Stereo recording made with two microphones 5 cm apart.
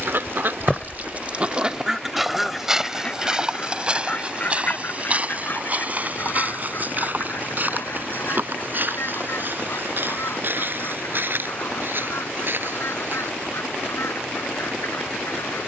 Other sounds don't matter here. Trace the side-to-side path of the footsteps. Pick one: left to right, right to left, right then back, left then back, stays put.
left to right.